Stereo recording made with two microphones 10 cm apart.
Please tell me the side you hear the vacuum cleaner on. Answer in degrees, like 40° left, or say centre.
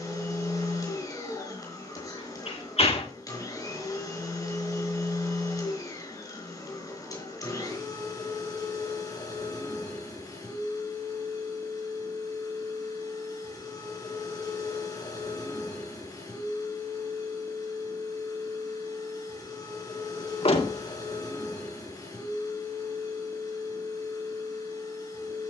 30° left.